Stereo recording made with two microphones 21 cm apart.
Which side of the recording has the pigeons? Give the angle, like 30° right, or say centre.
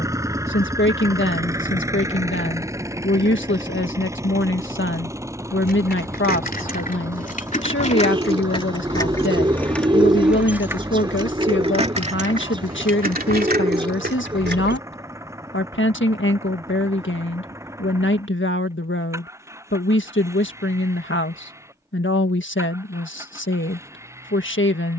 20° right.